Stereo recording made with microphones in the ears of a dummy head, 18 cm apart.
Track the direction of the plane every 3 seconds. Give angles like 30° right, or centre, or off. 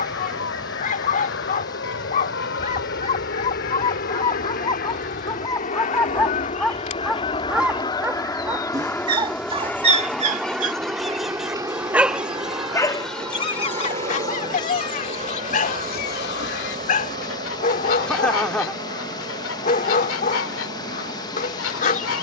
70° left, 50° left, 20° left, 10° right, 30° right, 40° right, 50° right, 50° right.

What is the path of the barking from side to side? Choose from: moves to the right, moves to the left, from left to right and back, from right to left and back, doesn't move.
from left to right and back.